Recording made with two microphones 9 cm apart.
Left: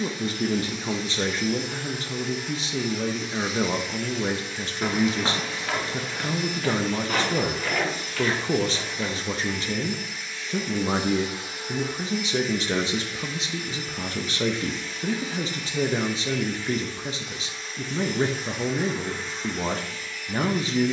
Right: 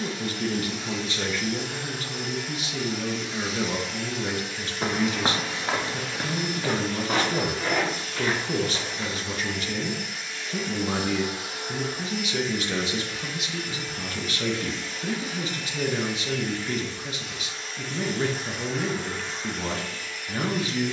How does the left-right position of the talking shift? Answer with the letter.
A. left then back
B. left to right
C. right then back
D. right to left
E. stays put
E.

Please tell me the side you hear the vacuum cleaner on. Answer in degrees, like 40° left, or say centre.
80° right.